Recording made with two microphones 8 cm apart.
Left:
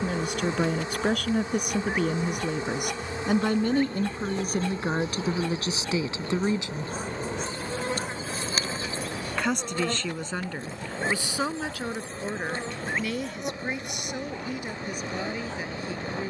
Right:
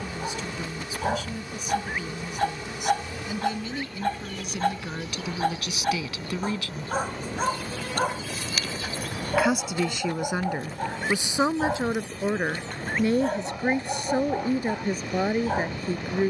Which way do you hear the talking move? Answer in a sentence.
In this clip you hear the talking move from left to right.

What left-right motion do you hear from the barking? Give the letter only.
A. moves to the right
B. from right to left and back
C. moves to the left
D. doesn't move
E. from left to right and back
D.